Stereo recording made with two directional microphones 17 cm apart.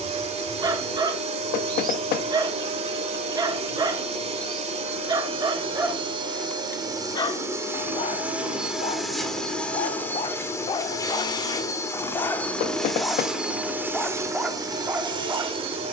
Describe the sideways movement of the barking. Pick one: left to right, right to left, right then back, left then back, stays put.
left then back.